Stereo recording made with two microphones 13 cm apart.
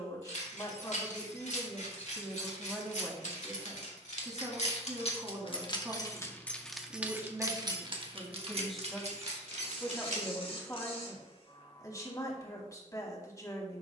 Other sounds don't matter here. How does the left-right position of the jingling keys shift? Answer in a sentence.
In this clip you hear the jingling keys travel towards the right.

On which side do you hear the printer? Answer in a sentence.
You can hear the printer on the left.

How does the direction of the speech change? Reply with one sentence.
In this clip you hear the speech move from left to right and back again.